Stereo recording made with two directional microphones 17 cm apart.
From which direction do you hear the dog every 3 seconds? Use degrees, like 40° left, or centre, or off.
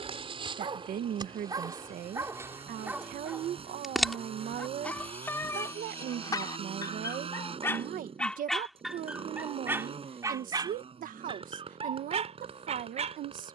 20° right, 10° left, 10° left, 20° right, 40° right.